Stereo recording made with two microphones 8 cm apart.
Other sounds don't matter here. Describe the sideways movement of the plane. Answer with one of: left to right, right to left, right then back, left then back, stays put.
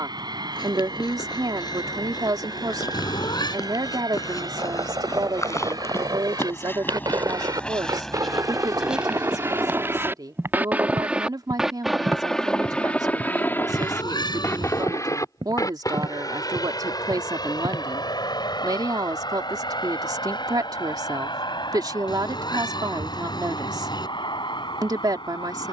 right to left.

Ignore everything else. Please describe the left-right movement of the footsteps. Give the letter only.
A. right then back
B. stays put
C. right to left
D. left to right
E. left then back
D.